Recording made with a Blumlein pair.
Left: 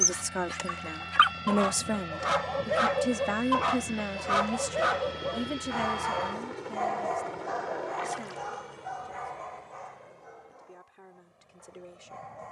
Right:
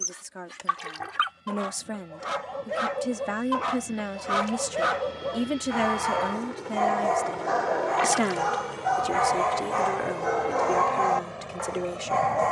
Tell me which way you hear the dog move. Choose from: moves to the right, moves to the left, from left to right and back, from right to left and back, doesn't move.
moves to the right.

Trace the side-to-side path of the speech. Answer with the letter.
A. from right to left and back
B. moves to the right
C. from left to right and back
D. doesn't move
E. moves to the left
B.